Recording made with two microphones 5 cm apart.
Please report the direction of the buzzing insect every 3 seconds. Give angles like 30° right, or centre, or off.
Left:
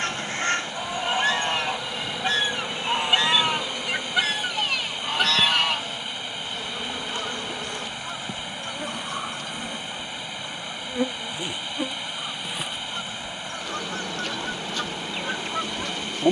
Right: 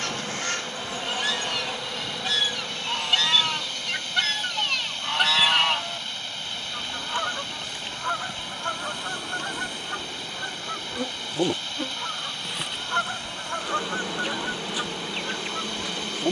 10° right, 50° left, 60° left, 30° left, 10° right, 10° right.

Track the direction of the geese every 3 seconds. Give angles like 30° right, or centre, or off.
30° left, 10° left, 40° right, 60° right, 30° right, 20° left.